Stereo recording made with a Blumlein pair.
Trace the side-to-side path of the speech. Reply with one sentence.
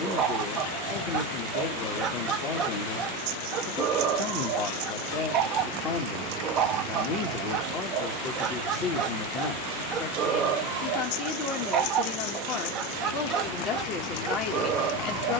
You can hear the speech stay put.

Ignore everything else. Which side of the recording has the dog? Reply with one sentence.
You can hear the dog on the right.